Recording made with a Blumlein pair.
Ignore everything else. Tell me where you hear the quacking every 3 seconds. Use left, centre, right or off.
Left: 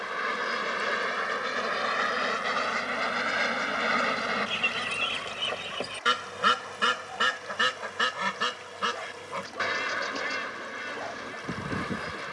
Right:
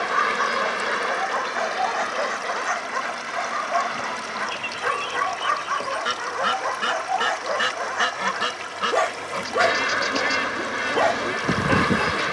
centre, centre, centre, right.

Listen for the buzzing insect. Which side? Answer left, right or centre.
right.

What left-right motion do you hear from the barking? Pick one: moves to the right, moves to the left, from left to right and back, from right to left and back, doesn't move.
doesn't move.